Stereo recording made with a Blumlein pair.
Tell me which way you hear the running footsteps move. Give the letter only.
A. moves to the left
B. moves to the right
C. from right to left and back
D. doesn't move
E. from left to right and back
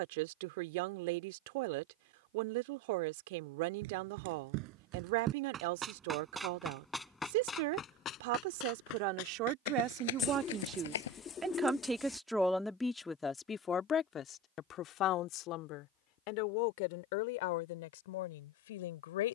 A.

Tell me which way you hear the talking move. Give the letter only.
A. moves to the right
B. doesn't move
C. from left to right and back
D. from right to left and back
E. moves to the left
E.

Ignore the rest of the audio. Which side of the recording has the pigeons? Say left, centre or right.
left.